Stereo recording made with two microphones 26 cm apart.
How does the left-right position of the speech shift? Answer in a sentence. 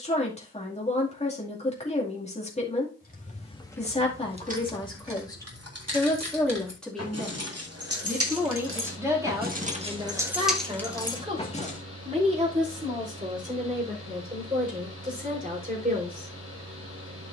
In this clip you hear the speech travel towards the right.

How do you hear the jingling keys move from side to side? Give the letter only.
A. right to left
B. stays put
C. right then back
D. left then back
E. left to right
C.